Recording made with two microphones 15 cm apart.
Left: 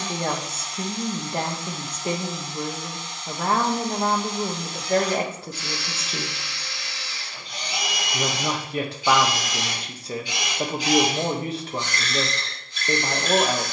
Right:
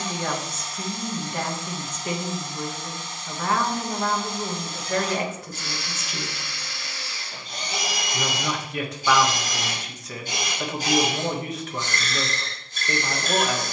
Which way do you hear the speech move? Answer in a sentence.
You can hear the speech stay put.